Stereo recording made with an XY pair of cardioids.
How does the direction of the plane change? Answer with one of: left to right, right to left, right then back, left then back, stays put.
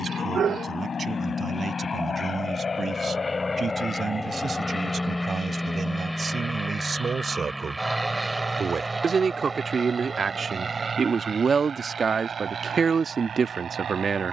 left to right.